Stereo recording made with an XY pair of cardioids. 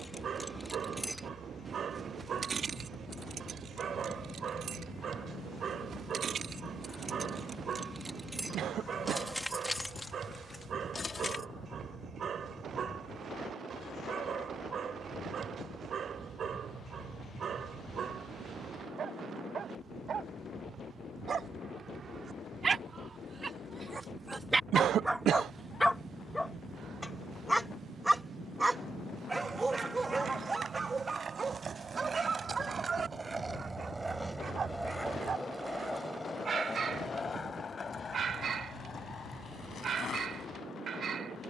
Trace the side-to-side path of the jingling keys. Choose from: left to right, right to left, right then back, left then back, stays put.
right then back.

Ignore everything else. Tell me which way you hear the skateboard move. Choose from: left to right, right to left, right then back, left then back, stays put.
right to left.